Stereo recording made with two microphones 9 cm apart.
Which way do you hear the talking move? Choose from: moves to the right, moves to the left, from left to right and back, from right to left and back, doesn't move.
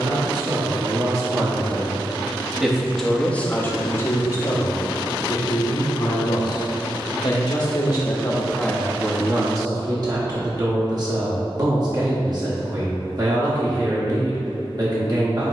from right to left and back.